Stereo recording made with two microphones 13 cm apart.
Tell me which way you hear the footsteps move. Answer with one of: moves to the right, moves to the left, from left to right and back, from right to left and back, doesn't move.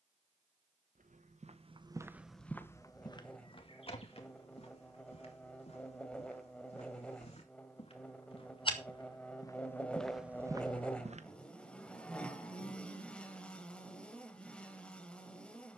from right to left and back.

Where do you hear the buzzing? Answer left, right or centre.
centre.